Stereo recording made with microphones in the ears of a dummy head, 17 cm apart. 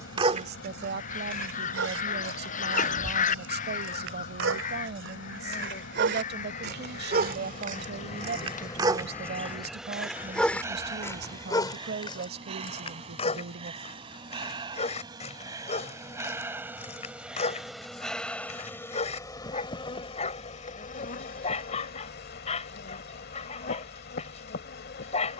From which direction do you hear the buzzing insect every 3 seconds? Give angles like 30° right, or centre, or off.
60° left, 60° left, 40° left, 10° right, 30° right, 10° right, 20° left, 50° left, 50° left.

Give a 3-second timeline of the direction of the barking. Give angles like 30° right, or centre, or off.
60° right, 70° right, 40° right, 10° left, 30° left, 40° left, 40° left, 40° left, 40° left.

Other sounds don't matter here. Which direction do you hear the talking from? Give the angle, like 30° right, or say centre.
60° right.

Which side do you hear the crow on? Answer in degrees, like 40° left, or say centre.
40° left.